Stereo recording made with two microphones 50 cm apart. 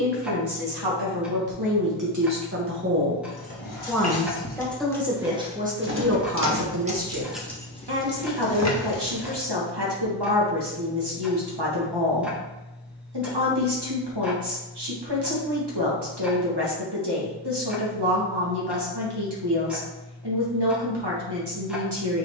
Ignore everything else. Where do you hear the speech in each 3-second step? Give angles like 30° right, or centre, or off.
40° right, 10° right, 40° right, 50° right, 50° right, 50° right, 50° right, 50° right.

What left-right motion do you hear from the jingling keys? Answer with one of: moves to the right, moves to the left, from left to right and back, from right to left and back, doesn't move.
from left to right and back.